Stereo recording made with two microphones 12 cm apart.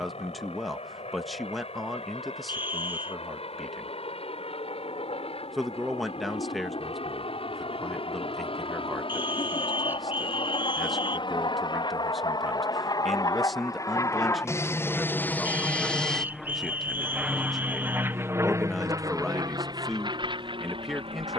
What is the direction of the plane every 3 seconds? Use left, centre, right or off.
left, left, left, left, left, centre, right.